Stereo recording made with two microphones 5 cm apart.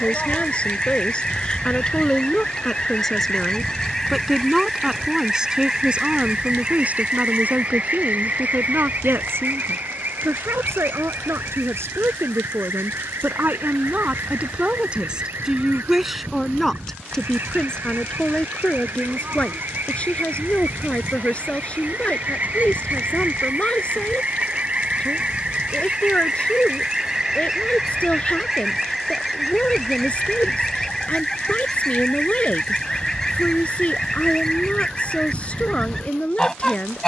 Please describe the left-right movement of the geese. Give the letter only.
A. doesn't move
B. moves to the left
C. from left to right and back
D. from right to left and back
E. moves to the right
C.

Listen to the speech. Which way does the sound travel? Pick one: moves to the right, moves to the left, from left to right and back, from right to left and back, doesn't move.
from left to right and back.